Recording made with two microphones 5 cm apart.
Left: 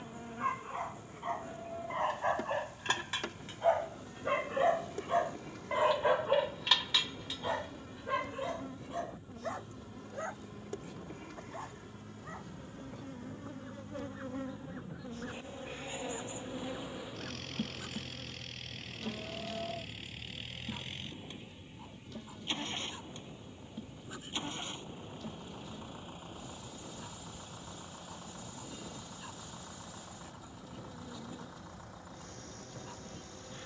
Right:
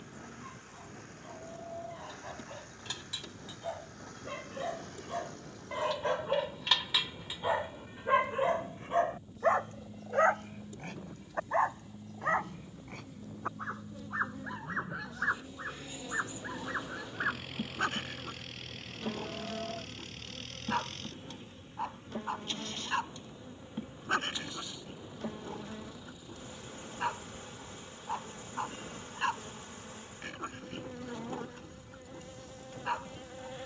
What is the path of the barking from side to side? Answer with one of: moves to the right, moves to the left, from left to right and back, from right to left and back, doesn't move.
moves to the right.